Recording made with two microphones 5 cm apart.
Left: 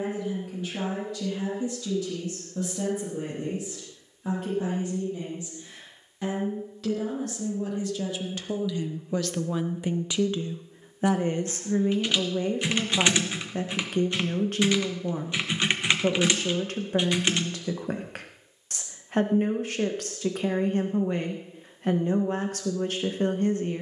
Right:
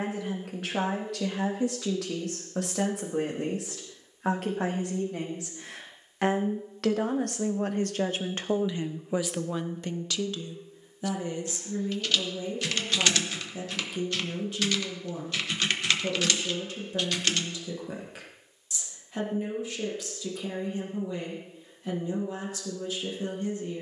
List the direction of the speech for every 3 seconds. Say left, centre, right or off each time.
right, right, right, left, left, left, left, left.